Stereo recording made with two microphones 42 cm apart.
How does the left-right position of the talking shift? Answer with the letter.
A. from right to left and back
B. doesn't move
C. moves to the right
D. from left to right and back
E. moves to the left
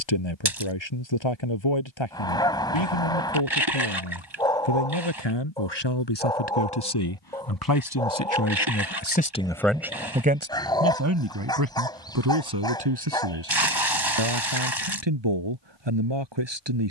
C.